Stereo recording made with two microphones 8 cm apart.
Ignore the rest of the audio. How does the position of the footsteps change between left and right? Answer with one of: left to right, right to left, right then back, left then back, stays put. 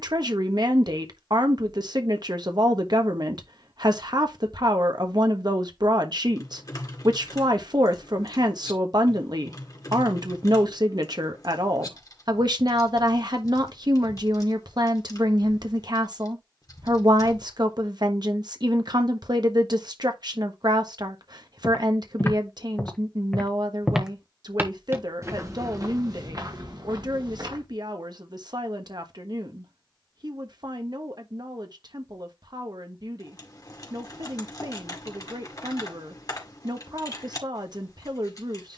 left to right.